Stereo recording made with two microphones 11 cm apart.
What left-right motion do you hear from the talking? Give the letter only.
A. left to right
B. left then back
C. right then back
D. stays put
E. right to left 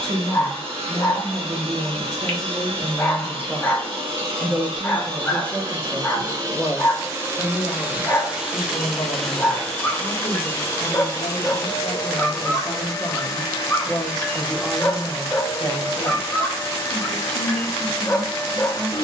B.